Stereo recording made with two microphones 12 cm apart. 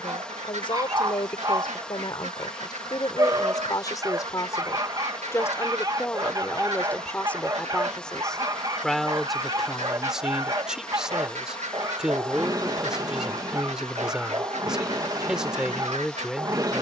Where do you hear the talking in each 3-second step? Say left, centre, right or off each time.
left, left, centre, centre, centre, centre.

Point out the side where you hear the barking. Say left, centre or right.
right.